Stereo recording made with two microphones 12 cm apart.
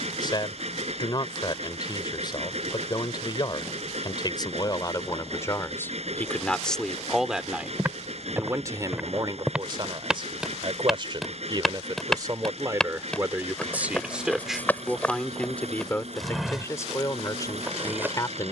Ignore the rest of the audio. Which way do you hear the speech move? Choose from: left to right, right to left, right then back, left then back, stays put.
right then back.